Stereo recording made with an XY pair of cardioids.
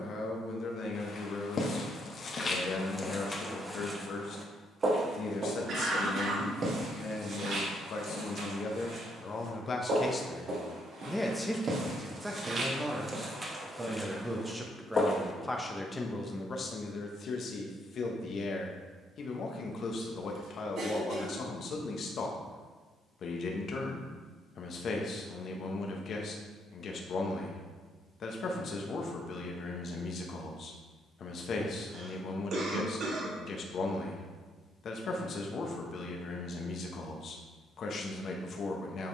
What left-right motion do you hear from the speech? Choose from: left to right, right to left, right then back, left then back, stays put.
right then back.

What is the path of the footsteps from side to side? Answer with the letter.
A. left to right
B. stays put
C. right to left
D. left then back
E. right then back
E.